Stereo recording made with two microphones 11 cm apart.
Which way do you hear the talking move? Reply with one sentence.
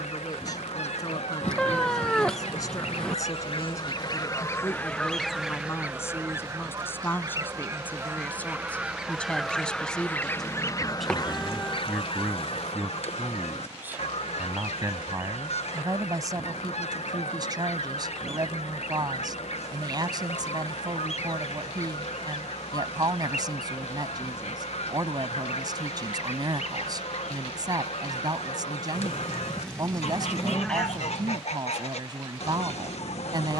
In this clip you hear the talking move to the right.